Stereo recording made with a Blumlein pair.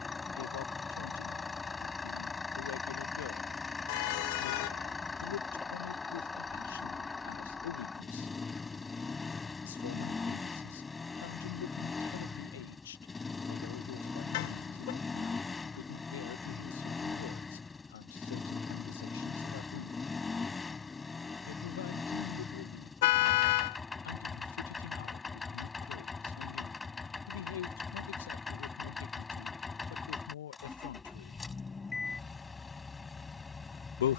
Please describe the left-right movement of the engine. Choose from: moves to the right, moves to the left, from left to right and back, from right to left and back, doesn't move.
doesn't move.